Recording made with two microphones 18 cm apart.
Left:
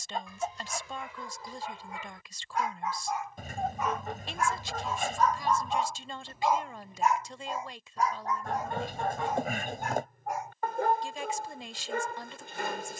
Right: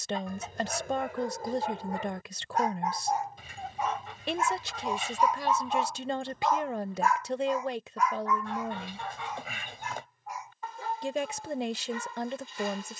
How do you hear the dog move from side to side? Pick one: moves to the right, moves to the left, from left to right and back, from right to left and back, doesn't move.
moves to the left.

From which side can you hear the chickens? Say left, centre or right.
left.